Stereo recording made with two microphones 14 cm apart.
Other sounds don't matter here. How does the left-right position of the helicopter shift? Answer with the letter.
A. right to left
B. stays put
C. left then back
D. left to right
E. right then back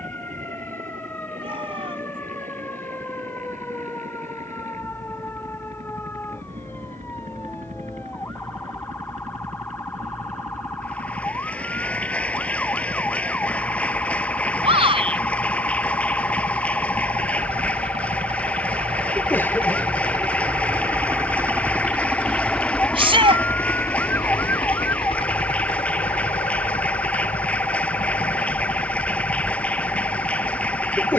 A.